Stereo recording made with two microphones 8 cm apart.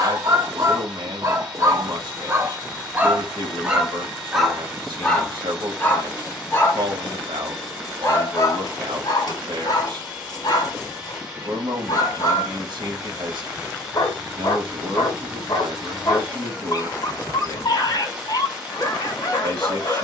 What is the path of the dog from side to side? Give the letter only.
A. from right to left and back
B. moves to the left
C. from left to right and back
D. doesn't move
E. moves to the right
B.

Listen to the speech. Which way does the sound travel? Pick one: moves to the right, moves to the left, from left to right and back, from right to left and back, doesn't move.
doesn't move.